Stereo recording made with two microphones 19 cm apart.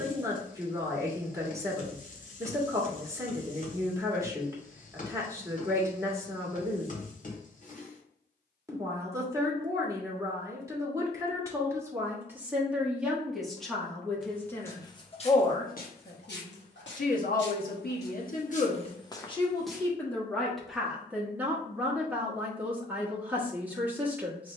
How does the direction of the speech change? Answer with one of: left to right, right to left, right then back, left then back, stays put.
left then back.